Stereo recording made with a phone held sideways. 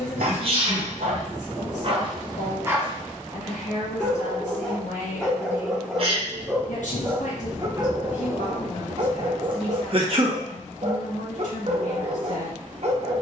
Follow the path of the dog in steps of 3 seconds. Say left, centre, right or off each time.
right, centre, right, right, right.